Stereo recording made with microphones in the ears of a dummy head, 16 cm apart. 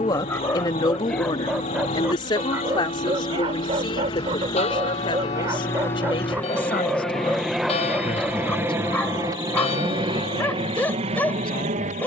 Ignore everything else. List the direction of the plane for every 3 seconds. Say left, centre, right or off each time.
left, left, centre, right.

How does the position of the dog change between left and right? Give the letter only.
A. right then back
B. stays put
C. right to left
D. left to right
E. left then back
A.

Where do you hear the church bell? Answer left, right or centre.
left.